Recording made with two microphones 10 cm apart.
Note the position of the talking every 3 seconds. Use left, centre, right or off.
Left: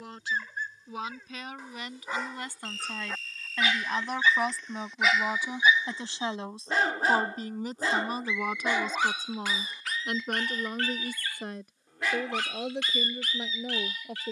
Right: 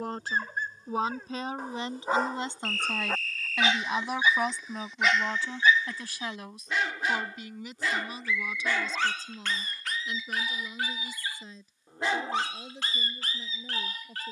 right, centre, left, left, left.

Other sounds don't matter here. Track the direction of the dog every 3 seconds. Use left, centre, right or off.
right, centre, left, centre, right.